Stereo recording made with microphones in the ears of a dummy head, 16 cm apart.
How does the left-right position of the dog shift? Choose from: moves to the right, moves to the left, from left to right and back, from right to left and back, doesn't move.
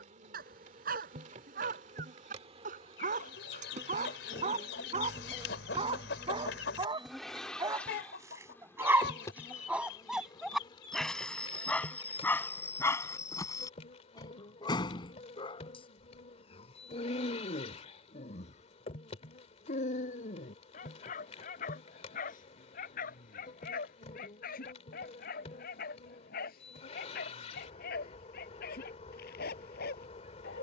moves to the left.